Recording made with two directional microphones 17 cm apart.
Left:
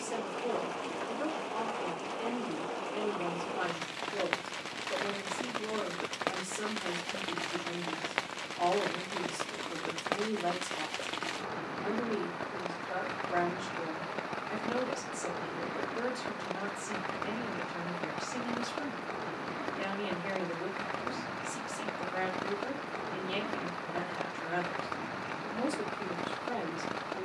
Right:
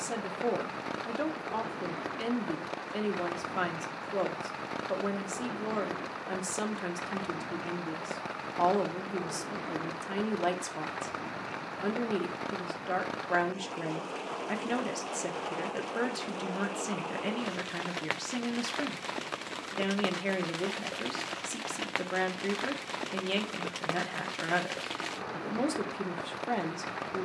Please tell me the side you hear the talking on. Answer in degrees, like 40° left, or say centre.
50° right.